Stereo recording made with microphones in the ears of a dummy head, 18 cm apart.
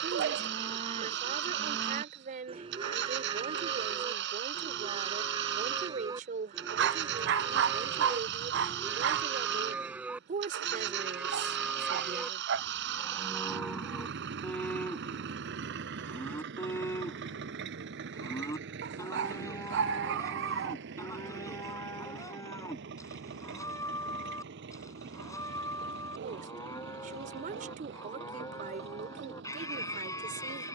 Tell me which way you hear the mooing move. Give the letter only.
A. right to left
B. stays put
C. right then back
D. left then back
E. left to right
A.